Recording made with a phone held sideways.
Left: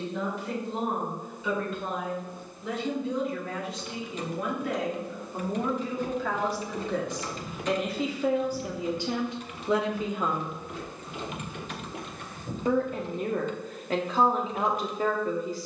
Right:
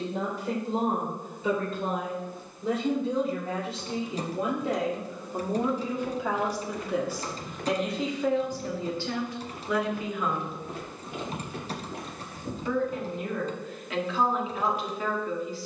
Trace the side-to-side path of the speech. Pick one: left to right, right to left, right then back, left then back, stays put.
right to left.